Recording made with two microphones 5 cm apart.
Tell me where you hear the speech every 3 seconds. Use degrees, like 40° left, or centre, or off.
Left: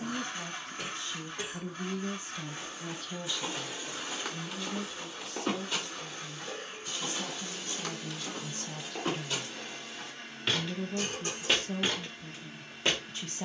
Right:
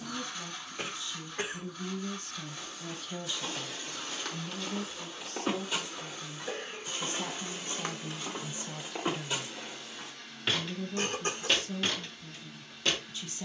40° left, 40° right, 30° right, 20° left, 50° left.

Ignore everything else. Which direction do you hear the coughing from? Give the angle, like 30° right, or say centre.
40° right.